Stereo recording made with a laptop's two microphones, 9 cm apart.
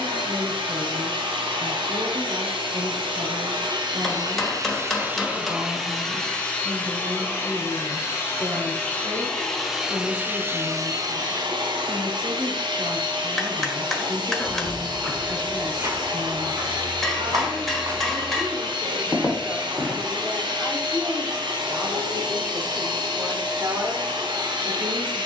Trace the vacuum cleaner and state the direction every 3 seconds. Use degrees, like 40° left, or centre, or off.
70° right, 40° right, 20° left, 30° right, 60° right, 60° right, 60° right, 60° right, 60° right.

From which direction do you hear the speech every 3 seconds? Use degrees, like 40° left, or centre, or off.
60° right, 60° right, 60° right, 60° right, 60° right, 60° right, 30° right, 20° right, 60° right.